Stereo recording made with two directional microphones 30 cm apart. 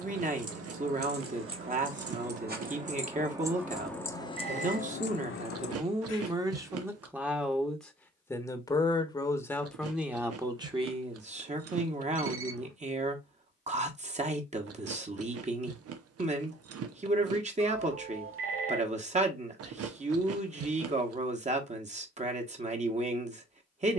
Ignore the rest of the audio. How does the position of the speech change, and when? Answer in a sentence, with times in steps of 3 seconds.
You can hear the speech on the right from 0 s, in the centre from 6 s and on the right from 12 s.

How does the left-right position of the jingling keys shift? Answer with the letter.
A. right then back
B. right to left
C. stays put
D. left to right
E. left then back
B.